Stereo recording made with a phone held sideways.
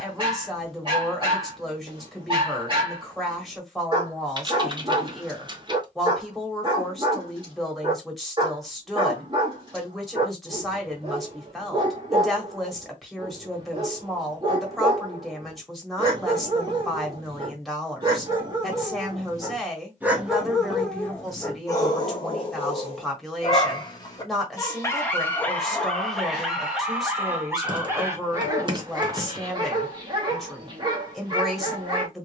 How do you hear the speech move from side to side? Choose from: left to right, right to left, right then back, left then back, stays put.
stays put.